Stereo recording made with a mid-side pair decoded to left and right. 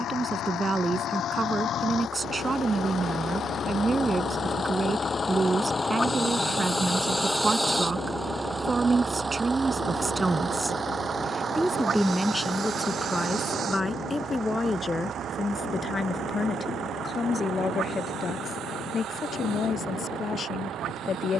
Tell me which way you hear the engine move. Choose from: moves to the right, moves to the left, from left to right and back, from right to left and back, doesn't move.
moves to the right.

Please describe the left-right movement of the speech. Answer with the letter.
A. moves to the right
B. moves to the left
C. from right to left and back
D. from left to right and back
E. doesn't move
B.